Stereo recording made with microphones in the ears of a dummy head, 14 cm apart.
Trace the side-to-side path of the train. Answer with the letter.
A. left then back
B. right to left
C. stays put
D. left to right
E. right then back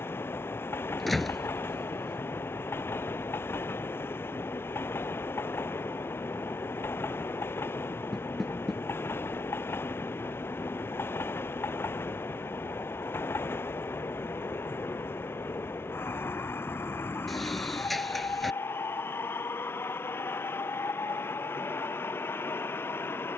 C.